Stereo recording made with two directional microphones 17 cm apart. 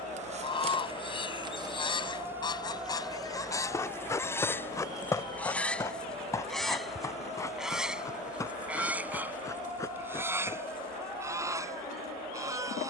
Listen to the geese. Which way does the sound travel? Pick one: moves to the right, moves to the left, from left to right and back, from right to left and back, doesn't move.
moves to the right.